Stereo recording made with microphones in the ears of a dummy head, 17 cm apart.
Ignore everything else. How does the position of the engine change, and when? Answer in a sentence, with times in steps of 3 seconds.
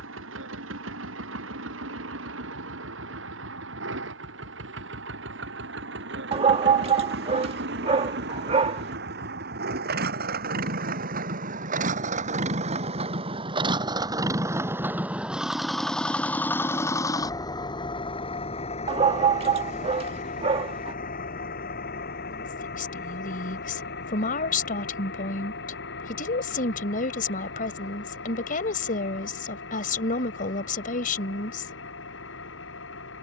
You can hear the engine on the right from 0 s, in the centre from 15 s and on the left from 18 s.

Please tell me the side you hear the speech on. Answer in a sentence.
You can hear the speech on the left.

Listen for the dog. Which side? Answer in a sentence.
In this clip you hear the dog on the right.